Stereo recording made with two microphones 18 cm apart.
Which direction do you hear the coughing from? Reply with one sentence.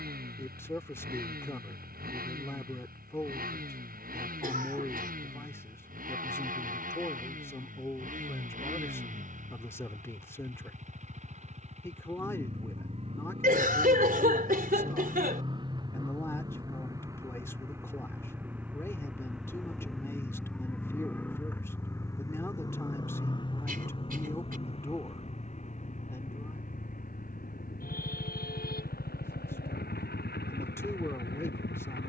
In this clip you hear the coughing on the right.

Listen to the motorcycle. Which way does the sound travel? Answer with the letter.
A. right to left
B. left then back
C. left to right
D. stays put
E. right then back
A.